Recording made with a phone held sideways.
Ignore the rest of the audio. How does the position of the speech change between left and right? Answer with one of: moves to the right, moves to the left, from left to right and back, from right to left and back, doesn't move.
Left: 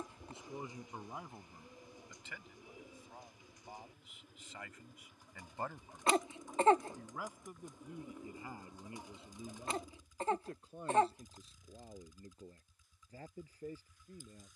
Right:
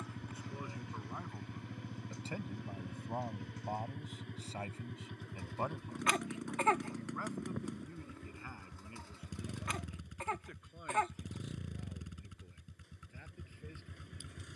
from left to right and back.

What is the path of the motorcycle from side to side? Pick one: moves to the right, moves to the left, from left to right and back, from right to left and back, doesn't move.
doesn't move.